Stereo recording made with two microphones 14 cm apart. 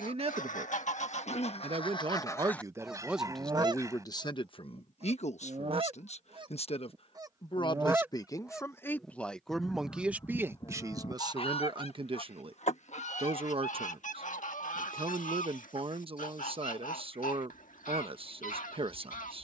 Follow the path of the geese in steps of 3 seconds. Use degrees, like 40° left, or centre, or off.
50° left, 40° right, 20° right, 30° left, 60° left, 70° left, 70° left.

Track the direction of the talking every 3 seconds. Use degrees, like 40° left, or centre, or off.
40° right, 30° left, 40° left, 20° right, 40° right, 40° right, 40° right.